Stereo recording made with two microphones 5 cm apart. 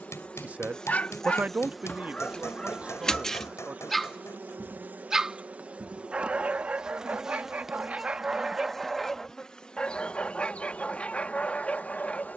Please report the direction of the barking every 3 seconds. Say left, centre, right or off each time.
left, centre, right, left.